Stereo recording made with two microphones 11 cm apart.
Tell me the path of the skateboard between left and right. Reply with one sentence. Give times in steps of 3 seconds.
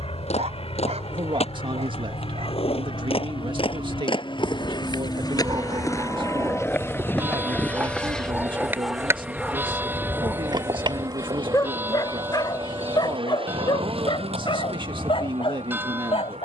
In this clip you hear the skateboard on the left from 0 s, in the centre from 6 s, on the right from 9 s and not at all from 15 s.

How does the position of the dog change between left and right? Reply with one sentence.
In this clip you hear the dog travel towards the left.